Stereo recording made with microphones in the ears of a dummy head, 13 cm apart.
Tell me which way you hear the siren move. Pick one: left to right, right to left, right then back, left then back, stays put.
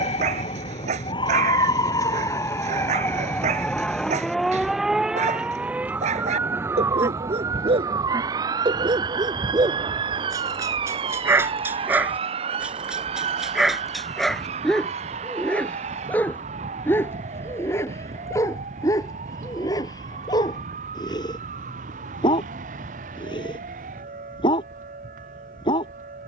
left to right.